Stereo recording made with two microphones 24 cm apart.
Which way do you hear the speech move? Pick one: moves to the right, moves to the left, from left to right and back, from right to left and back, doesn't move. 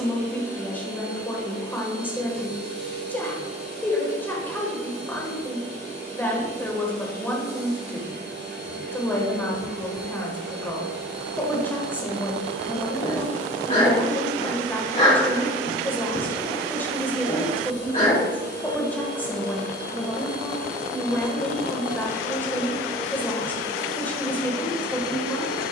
doesn't move.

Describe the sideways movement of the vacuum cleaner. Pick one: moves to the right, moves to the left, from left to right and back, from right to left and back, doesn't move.
doesn't move.